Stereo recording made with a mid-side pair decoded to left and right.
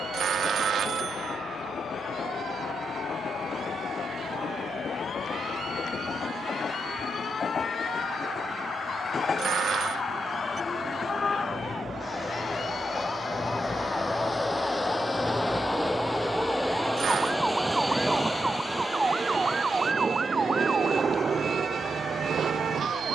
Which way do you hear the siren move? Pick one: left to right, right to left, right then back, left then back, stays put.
left to right.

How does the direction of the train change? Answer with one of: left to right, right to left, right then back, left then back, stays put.
left to right.